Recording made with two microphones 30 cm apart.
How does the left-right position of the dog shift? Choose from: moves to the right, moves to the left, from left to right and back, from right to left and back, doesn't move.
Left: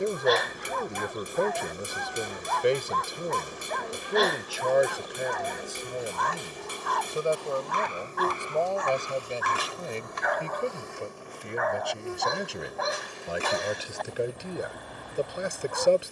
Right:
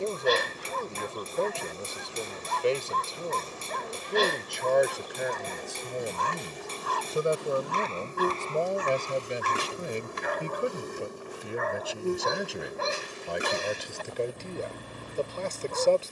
doesn't move.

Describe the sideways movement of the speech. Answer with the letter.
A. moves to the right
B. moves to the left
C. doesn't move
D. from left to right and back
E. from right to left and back
D.